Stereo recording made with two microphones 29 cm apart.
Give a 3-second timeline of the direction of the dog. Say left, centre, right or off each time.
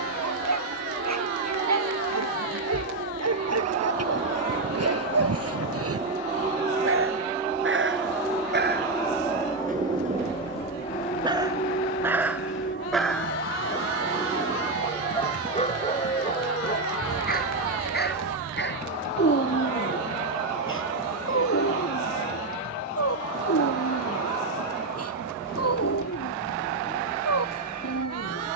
right, right, right, right, centre, left, left, left, left, left.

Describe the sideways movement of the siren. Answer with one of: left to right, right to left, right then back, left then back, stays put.
right to left.